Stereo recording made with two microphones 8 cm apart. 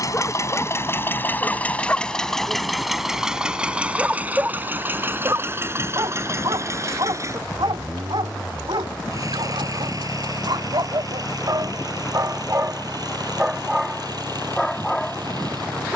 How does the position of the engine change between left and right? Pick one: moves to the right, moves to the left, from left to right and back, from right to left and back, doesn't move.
moves to the right.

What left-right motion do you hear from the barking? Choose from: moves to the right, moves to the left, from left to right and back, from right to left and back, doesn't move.
from left to right and back.